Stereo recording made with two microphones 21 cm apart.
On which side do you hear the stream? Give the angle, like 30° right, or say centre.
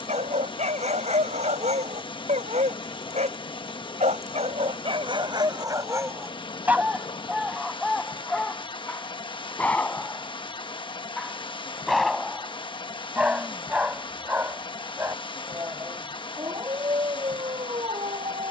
20° left.